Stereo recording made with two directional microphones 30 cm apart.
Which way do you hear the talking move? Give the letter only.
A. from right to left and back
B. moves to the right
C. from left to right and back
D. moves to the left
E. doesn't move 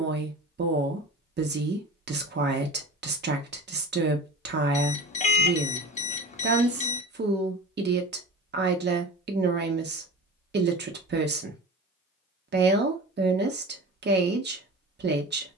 E.